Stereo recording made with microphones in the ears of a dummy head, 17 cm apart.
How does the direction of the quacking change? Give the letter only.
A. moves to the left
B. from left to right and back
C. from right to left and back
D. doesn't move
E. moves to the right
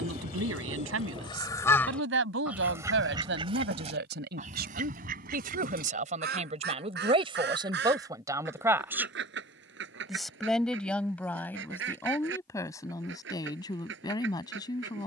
E.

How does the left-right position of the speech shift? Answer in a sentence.
In this clip you hear the speech go from the right side to the left.